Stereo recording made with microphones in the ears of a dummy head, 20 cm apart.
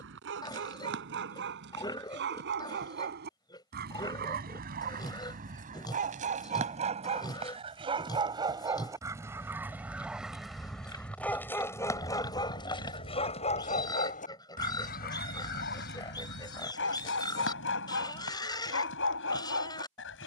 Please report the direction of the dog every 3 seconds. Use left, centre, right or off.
right, right, right, centre, left, left, left.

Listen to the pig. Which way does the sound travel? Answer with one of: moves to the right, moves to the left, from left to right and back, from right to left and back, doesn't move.
doesn't move.